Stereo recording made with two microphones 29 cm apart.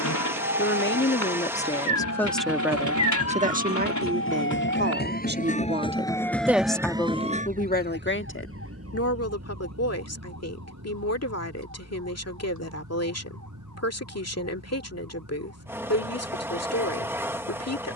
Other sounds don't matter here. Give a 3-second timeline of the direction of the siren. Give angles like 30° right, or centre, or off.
60° left, 40° left, 20° right, 70° right, 80° right, 80° right.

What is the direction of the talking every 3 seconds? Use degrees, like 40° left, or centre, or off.
20° left, 30° right, 20° left, 60° left, 60° left, 60° left.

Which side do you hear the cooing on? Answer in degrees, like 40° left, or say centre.
80° left.